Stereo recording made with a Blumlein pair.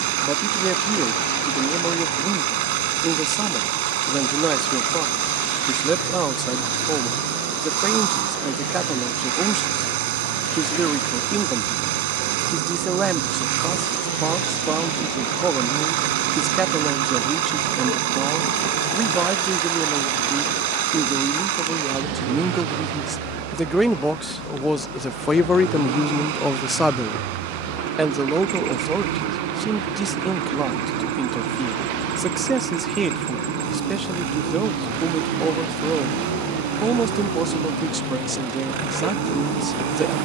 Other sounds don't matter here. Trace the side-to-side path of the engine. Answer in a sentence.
You can hear the engine stay put.